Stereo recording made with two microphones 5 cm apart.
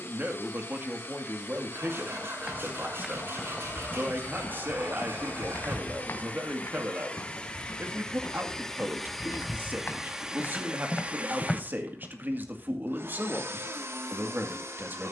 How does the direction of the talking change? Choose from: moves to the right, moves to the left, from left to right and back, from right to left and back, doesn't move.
doesn't move.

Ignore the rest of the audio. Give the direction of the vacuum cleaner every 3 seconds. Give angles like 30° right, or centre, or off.
50° left, 40° left, 20° left, 20° right, 60° right.